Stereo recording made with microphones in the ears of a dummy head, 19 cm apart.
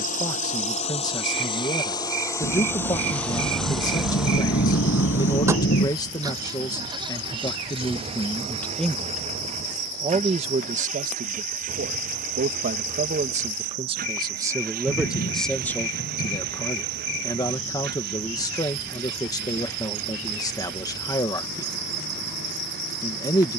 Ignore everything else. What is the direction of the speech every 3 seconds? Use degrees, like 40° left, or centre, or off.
20° left, 20° left, 10° left, 30° right, 30° right, 10° left, 20° left, 20° left.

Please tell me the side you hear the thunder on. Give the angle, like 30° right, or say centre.
50° left.